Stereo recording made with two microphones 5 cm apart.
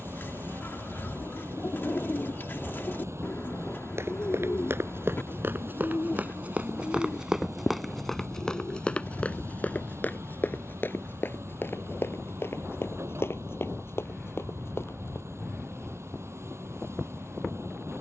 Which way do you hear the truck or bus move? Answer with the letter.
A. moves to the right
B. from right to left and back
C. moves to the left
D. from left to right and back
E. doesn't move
E.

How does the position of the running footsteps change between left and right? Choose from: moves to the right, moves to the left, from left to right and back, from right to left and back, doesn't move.
moves to the left.